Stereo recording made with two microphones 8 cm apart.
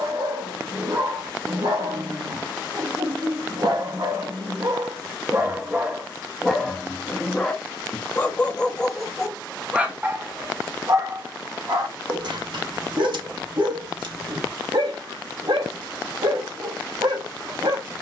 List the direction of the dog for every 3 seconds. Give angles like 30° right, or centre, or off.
70° right, 40° right, 10° left, 30° right, 70° right, 70° right.